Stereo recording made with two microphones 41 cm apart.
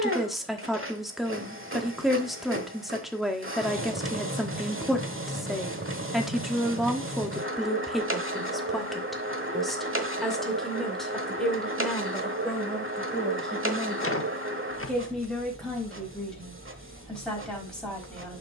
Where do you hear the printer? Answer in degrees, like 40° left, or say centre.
30° right.